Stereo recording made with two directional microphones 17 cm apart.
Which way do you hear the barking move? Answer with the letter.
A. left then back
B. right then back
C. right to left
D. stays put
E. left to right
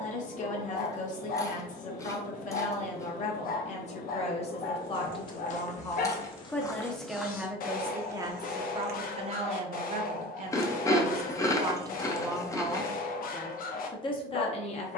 D.